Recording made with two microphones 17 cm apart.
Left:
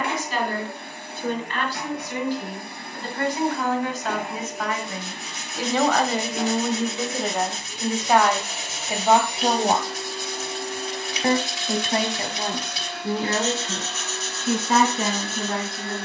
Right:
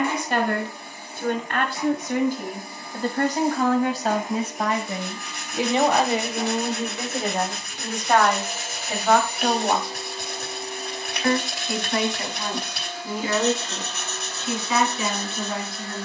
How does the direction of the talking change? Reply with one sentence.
In this clip you hear the talking move from right to left.